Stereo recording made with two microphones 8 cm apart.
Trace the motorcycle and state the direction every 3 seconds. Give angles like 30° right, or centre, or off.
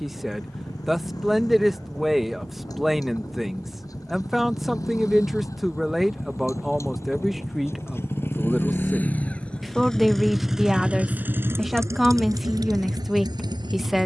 60° left, 50° left, 40° left, 10° right, 60° right.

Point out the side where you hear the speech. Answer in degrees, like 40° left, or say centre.
centre.